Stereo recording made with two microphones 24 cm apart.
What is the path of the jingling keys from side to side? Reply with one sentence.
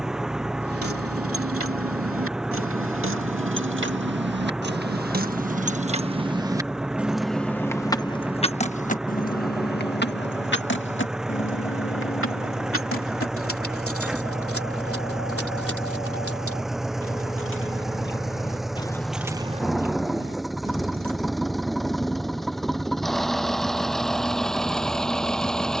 In this clip you hear the jingling keys go left and come back.